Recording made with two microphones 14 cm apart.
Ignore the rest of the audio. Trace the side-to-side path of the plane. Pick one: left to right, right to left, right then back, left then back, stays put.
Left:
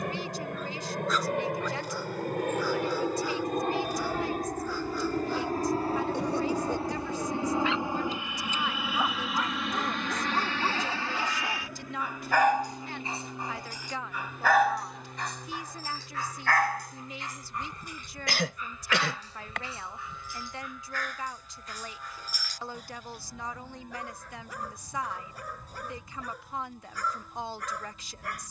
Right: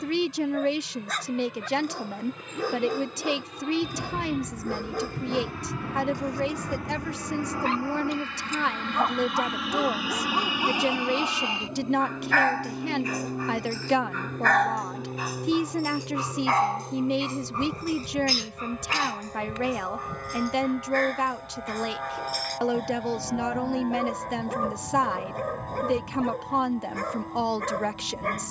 left to right.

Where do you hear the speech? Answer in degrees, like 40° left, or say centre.
70° right.